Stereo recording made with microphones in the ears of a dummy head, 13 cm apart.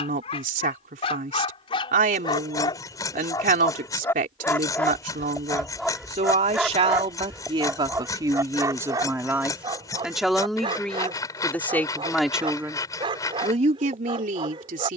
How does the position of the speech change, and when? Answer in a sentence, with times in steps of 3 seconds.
In this clip you hear the speech on the right from 0 s, in the centre from 9 s and on the right from 12 s.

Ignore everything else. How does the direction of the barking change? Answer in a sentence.
In this clip you hear the barking go from the left side to the right.